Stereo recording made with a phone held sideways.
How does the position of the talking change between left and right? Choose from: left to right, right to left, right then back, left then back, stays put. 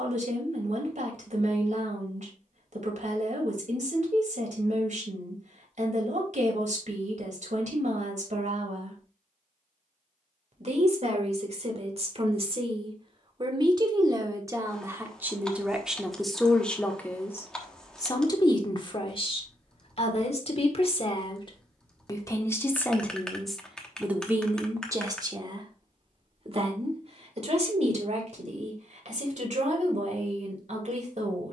left then back.